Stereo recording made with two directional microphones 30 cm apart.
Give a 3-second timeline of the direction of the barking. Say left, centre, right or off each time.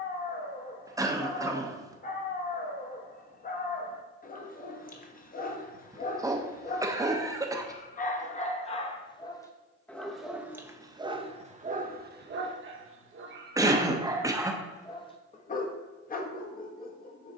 left, left, left, centre, right, left.